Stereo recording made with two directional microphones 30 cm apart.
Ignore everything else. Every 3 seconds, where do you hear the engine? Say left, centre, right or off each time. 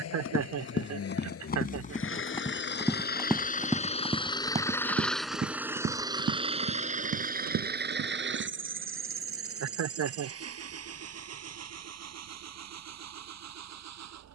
left, centre, right, right, right.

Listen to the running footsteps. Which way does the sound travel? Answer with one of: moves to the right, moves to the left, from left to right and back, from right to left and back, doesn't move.
moves to the right.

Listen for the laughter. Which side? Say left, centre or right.
right.